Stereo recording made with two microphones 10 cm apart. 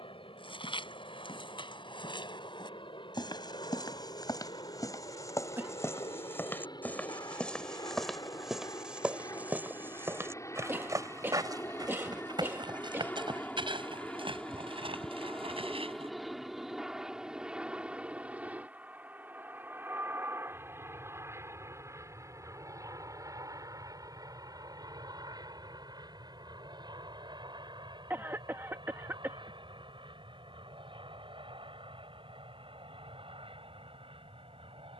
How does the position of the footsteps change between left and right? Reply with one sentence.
In this clip you hear the footsteps travel towards the right.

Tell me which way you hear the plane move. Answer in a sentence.
You can hear the plane travel towards the right.